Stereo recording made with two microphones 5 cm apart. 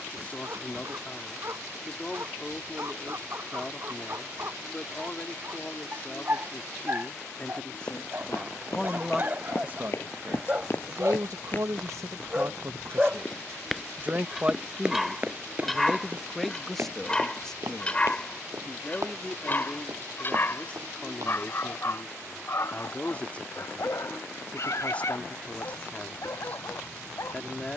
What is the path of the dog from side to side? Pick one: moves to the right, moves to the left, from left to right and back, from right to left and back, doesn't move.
moves to the left.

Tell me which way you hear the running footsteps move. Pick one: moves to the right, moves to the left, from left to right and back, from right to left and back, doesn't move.
moves to the right.